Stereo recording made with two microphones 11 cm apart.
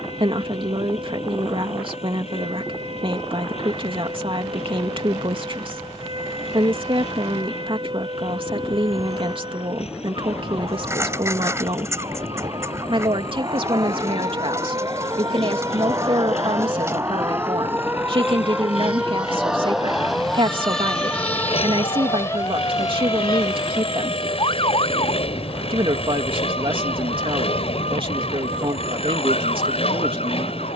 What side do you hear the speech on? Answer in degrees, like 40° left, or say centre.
50° right.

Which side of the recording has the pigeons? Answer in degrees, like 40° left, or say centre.
20° right.